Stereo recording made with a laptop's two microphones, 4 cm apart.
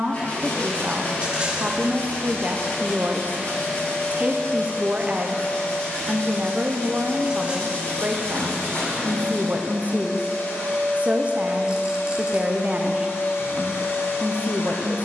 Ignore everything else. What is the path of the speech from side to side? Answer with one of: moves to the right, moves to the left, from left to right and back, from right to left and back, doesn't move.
doesn't move.